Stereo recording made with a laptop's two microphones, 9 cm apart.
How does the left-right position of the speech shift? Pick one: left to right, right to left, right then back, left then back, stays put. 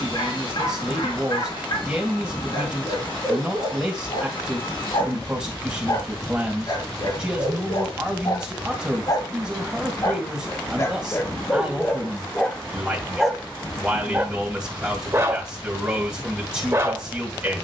stays put.